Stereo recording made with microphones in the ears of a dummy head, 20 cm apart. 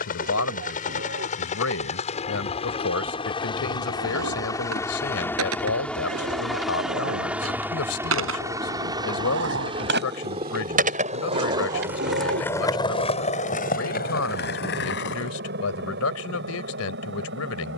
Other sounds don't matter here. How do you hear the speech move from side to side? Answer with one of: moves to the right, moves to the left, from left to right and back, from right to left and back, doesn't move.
doesn't move.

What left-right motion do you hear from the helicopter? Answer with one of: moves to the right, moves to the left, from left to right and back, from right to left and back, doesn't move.
moves to the right.